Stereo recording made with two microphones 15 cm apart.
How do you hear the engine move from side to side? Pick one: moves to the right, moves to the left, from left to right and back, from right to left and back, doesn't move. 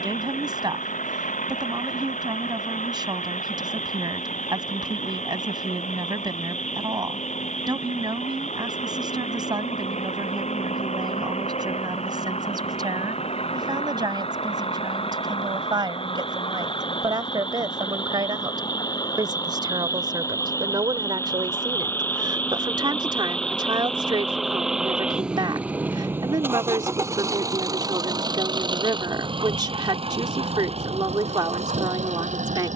moves to the right.